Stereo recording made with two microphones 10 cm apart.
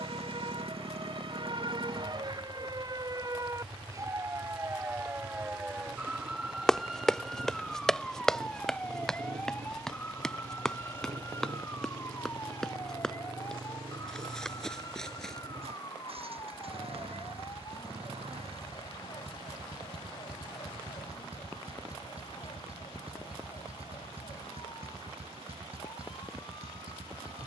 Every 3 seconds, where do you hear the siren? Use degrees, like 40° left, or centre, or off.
50° right, 30° right, centre, 20° left, 30° left, 40° left, 40° left, 50° left, 50° left.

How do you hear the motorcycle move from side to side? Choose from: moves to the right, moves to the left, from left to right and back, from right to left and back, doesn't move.
doesn't move.